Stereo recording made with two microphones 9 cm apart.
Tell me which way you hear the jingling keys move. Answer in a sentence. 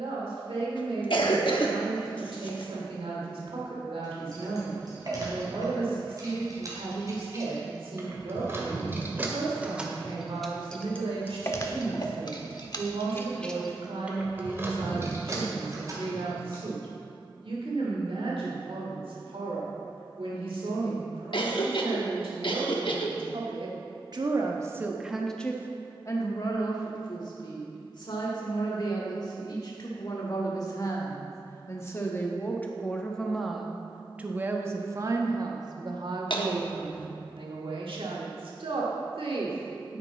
You can hear the jingling keys go left and come back.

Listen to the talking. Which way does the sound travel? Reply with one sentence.
In this clip you hear the talking go left and come back.